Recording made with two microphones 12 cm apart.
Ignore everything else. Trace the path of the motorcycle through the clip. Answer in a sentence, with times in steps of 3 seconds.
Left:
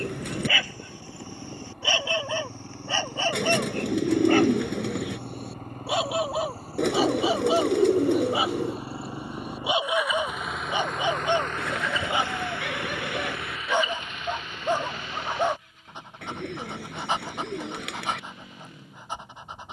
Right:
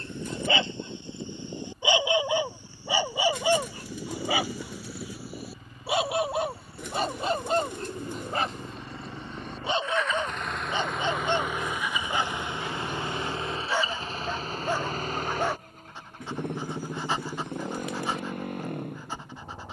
You can hear the motorcycle on the left from 0 s, in the centre from 9 s and on the right from 12 s.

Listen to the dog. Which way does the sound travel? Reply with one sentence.
You can hear the dog travel towards the left.